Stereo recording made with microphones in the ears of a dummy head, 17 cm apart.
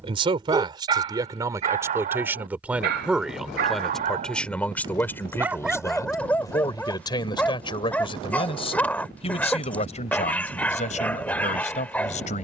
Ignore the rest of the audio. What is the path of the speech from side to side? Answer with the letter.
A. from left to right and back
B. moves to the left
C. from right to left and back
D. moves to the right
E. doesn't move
B.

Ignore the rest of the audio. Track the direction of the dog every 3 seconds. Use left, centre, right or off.
right, right, centre, centre.